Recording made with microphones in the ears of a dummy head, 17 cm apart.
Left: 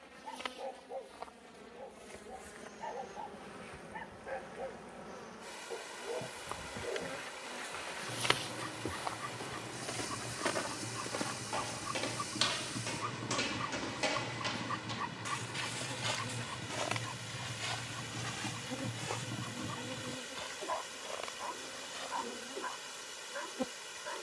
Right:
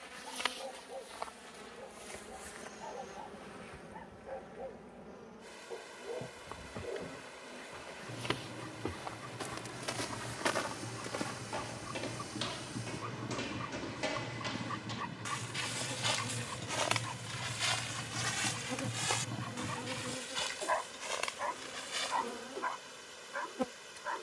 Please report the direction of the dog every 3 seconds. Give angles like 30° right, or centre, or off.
50° left, 50° left, 50° left, 40° left, 20° left, 10° right, 40° right, 70° right.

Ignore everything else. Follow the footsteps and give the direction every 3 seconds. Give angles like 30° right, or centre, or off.
off, off, 60° right, 10° right, 30° left, 20° right, 50° right, 60° right.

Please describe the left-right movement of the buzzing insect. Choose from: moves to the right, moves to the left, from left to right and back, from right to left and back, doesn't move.
from right to left and back.